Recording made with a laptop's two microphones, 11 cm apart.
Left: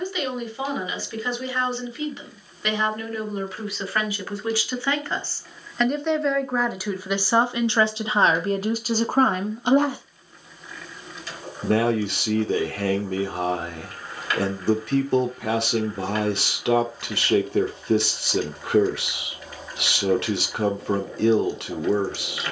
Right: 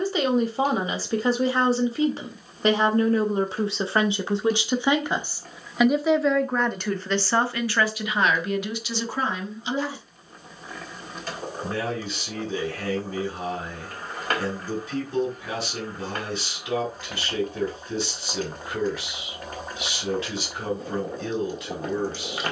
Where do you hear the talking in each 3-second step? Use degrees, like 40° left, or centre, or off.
40° right, 20° right, 20° left, 60° left, 70° left, 70° left, 70° left, 70° left.